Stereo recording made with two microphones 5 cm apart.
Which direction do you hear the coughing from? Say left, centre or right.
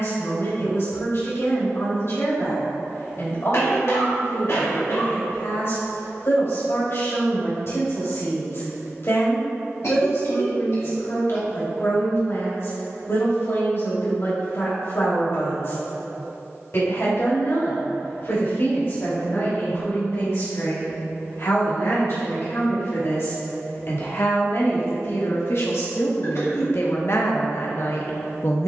left.